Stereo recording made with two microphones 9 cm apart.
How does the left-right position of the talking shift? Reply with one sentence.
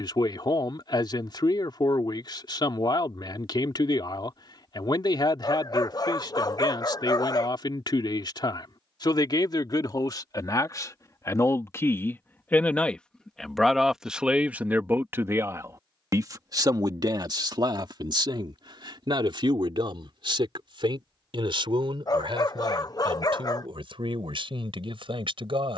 In this clip you hear the talking travel towards the right.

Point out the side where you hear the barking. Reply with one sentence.
You can hear the barking on the left.